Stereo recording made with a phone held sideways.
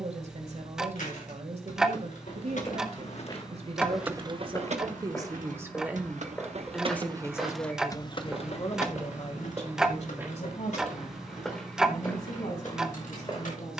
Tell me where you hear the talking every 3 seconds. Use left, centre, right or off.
right, right, left, left, left.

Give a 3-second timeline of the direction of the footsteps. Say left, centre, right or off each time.
left, left, centre, centre, left.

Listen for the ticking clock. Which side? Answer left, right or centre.
centre.